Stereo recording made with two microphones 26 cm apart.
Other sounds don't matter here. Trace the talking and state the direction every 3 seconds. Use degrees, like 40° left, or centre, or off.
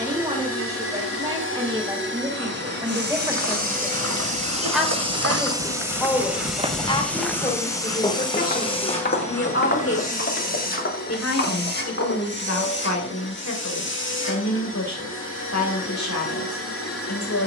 20° right, centre, 20° left, 60° left, 80° left, 80° left.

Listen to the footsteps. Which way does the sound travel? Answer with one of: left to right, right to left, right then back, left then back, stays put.
right to left.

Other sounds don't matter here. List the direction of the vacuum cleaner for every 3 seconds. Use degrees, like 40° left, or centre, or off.
50° right, 20° right, 10° left, 30° left, 50° left, 50° left.